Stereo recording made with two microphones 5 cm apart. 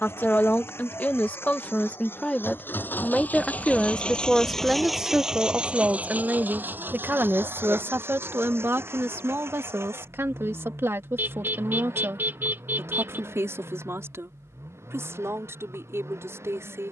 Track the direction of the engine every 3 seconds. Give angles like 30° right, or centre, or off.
60° left, 10° left, 50° right, 70° right, 80° right, 80° right.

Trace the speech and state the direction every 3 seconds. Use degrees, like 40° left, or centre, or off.
40° left, 10° right, 50° right, 70° right, 80° right, 80° right.